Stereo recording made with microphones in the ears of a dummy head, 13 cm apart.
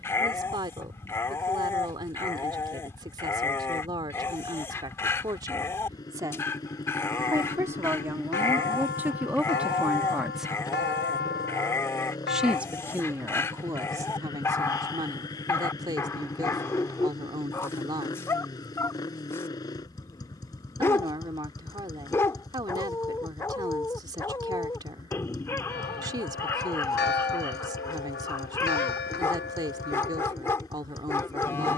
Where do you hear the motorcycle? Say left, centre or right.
left.